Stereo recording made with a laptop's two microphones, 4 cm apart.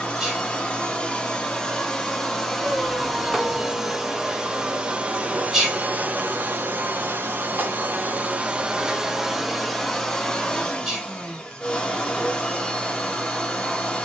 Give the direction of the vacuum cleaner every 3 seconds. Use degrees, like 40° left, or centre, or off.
20° left, 20° right, 40° right, 10° left, 20° left.